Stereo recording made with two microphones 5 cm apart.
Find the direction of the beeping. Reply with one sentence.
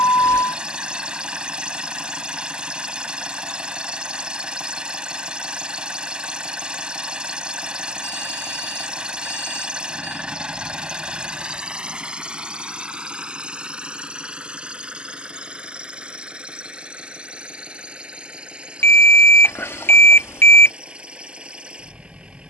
In this clip you hear the beeping on the left.